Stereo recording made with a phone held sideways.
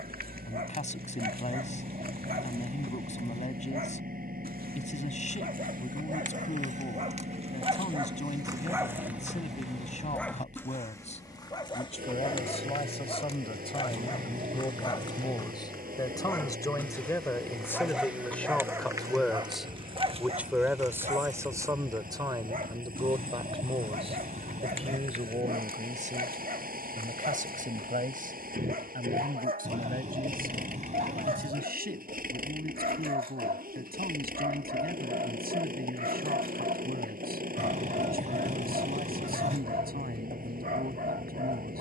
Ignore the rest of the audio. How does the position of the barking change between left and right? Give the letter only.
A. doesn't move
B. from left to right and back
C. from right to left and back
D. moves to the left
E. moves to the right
C.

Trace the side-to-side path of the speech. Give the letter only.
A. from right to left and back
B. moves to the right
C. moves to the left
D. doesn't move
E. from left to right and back
B.